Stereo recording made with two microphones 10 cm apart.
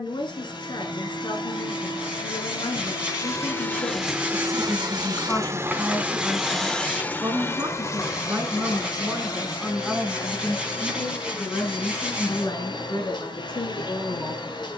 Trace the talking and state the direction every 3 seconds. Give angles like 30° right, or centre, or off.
60° left, 40° left, 20° right, 10° left, 50° left.